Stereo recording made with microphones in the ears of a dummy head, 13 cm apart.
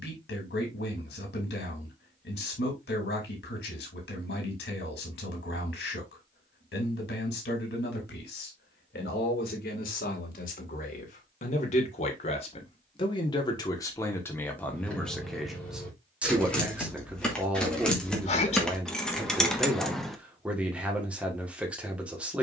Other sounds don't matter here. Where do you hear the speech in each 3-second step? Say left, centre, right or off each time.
left, left, left, left, left, centre, centre, centre.